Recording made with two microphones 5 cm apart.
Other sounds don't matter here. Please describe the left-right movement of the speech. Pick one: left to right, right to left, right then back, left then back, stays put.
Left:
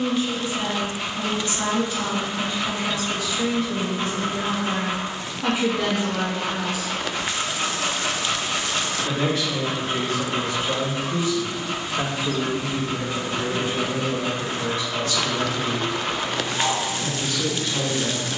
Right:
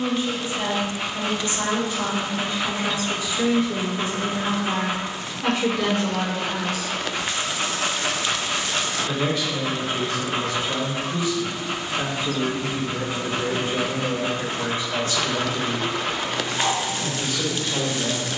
left then back.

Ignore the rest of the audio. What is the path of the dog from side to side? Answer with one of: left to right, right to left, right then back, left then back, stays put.
stays put.